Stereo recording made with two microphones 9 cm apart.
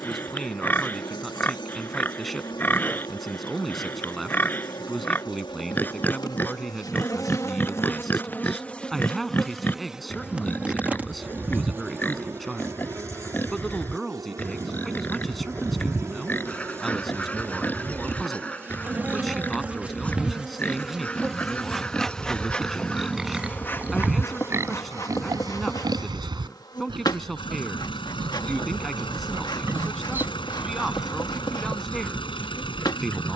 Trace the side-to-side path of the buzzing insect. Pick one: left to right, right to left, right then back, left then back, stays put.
right then back.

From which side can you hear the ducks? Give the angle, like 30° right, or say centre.
20° left.